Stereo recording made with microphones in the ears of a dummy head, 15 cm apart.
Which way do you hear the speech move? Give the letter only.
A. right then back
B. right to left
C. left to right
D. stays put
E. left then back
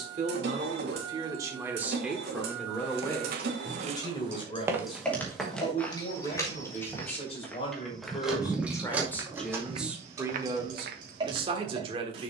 E.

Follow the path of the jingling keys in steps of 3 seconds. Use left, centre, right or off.
off, centre, centre, right.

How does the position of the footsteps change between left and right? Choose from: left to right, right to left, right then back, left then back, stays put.
left then back.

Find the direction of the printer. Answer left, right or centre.
right.